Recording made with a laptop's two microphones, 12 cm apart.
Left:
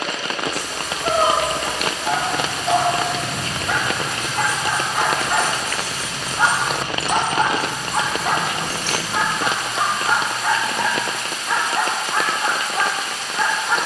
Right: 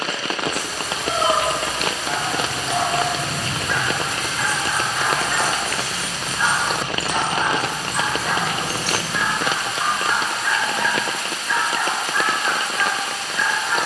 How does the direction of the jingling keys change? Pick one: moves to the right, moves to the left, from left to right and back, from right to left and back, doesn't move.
from right to left and back.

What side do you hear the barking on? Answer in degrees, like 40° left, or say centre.
50° left.